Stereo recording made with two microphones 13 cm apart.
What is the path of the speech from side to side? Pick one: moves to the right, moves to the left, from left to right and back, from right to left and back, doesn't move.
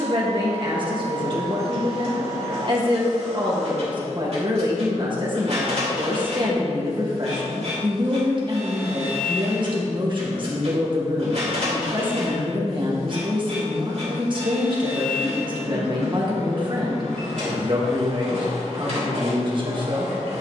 doesn't move.